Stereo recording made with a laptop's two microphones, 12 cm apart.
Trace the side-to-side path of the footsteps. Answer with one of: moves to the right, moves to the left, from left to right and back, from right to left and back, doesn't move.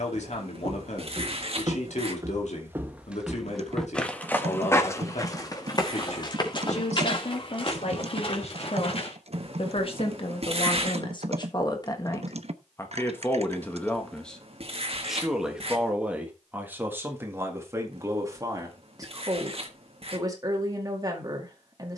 moves to the left.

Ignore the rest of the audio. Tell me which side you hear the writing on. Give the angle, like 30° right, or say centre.
50° right.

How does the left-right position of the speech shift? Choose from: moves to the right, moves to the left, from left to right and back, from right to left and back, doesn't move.
moves to the right.